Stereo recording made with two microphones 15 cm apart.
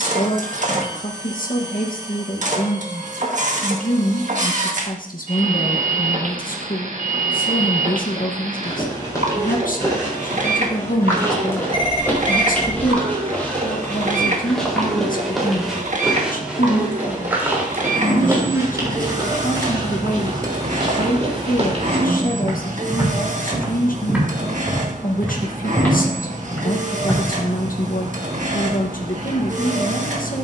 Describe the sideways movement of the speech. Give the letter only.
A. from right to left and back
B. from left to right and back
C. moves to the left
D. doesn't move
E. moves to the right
D.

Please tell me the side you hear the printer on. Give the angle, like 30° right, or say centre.
60° right.